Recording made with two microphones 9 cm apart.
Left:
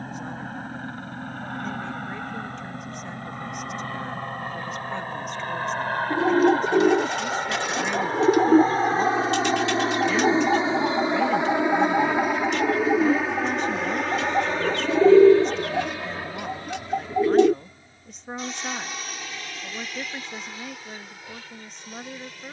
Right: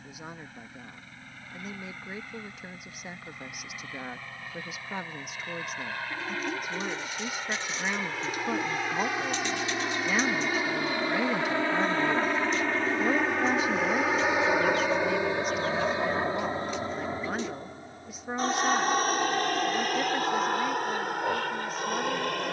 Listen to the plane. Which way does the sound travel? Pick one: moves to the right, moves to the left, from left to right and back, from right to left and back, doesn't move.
moves to the right.